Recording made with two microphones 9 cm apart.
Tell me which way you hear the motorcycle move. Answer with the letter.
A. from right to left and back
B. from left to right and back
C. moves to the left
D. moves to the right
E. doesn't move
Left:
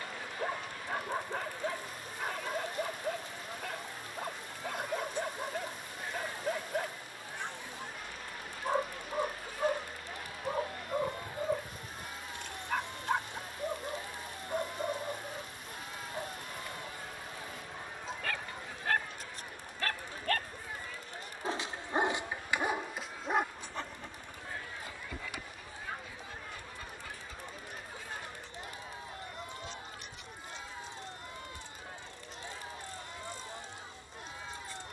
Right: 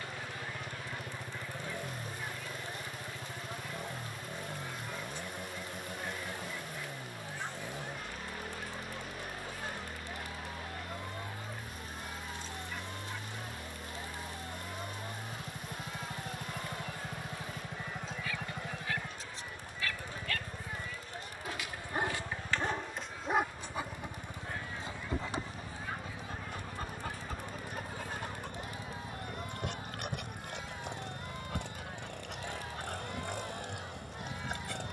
E.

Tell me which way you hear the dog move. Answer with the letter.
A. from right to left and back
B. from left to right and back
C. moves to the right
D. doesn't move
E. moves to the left
C.